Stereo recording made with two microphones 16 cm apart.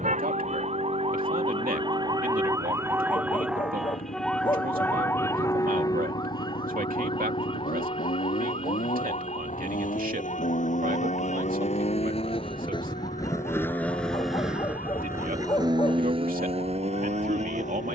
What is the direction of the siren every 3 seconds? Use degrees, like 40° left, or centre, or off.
30° right, 10° left, 30° left, 50° left, 50° left, 60° left.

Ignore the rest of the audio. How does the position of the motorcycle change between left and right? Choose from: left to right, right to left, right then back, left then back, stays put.
left to right.